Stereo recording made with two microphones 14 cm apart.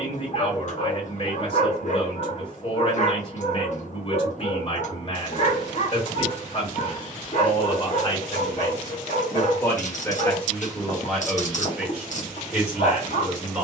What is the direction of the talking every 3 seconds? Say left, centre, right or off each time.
left, left, left, centre, centre.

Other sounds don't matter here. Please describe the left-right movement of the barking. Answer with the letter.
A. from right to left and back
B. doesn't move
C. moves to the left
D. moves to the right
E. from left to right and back
B.